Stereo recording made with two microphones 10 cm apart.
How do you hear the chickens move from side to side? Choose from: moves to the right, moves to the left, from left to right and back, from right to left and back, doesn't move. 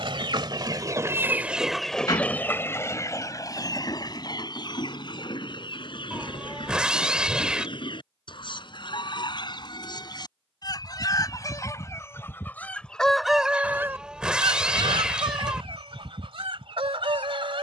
from right to left and back.